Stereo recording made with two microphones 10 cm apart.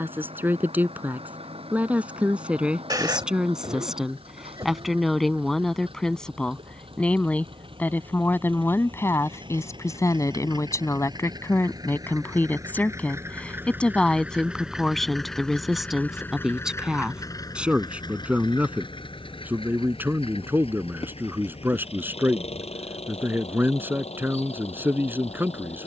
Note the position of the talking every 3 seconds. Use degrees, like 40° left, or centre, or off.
10° right, centre, 20° left, 30° left, 10° left, centre, 20° right, 20° right, 20° right.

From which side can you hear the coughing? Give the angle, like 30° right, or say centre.
40° right.